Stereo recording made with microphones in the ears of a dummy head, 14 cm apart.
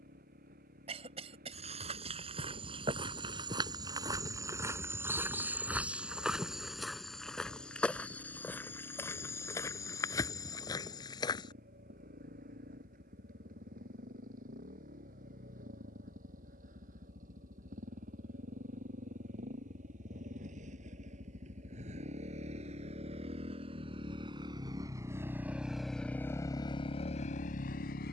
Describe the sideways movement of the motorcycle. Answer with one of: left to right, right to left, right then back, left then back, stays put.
right to left.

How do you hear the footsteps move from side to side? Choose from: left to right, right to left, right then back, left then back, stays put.
right to left.